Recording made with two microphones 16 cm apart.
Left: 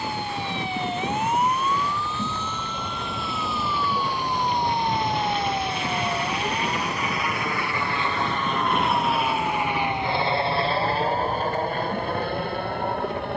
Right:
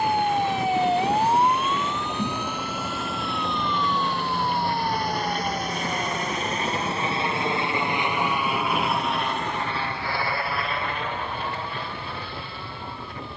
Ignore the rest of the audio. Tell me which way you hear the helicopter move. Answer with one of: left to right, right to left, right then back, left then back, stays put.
right to left.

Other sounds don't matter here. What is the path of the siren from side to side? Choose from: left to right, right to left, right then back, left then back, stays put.
right to left.